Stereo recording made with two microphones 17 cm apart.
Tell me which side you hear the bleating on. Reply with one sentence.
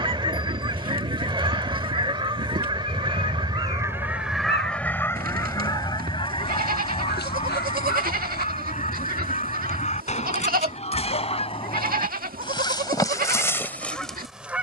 In this clip you hear the bleating on the right.